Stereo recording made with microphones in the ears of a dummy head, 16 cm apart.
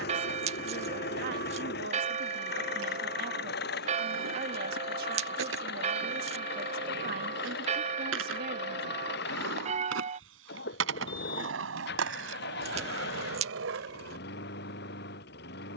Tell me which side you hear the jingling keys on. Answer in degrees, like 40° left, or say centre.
40° right.